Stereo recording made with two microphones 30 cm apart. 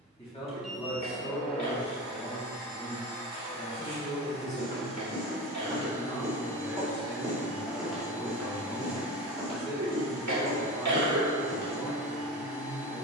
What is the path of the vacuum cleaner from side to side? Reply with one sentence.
You can hear the vacuum cleaner stay put.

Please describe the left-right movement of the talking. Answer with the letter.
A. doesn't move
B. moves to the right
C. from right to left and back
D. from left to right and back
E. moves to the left
A.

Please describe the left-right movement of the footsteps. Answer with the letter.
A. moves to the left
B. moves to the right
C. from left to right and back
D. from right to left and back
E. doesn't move
A.